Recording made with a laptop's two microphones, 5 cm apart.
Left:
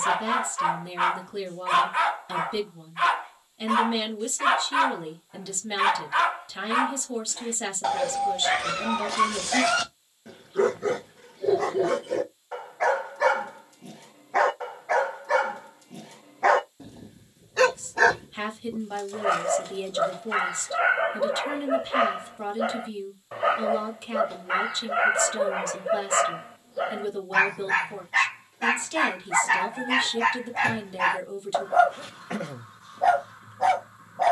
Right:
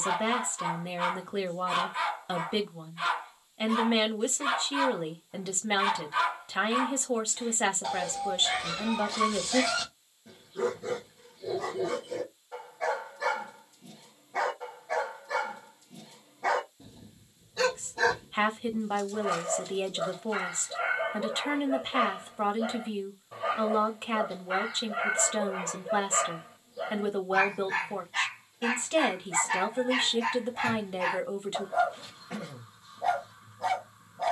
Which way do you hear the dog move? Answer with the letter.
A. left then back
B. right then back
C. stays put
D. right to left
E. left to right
C.